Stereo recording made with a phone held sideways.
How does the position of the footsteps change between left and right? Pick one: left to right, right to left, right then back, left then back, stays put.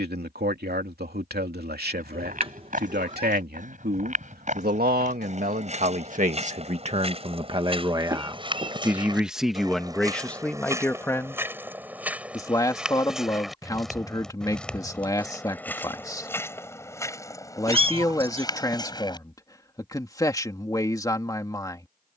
right to left.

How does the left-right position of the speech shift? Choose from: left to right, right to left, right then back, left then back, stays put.
right to left.